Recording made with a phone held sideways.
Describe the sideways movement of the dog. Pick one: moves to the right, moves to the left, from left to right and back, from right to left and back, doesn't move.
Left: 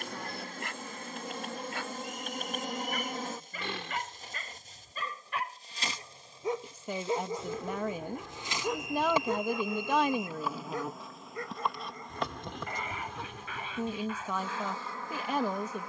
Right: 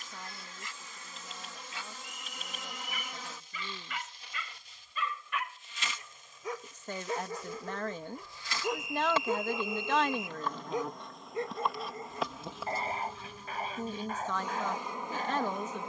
moves to the right.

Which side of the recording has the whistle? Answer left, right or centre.
centre.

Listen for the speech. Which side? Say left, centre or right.
centre.